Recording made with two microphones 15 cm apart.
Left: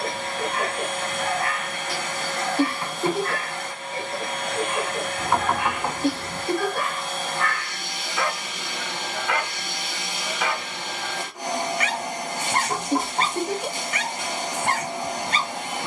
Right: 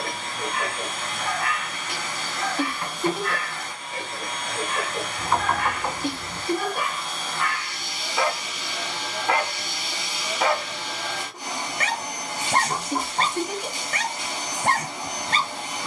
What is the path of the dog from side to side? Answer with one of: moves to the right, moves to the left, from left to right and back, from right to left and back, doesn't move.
moves to the right.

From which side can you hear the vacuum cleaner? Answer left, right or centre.
left.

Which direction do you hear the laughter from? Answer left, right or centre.
left.